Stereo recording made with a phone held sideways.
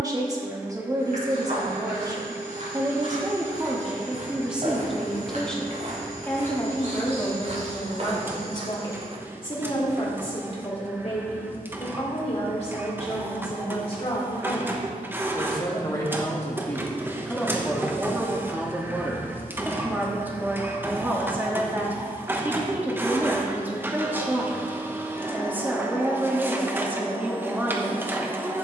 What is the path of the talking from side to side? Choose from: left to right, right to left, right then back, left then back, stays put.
left then back.